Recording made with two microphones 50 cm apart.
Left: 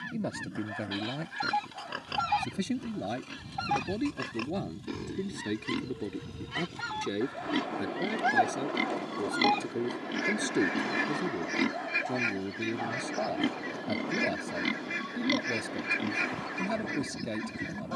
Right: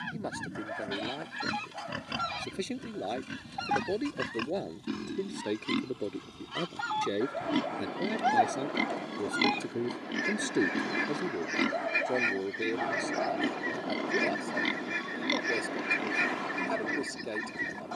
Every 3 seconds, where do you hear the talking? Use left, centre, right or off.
left, left, centre, centre, left, left.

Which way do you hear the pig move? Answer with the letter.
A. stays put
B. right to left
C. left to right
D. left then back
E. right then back
B.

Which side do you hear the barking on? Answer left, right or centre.
right.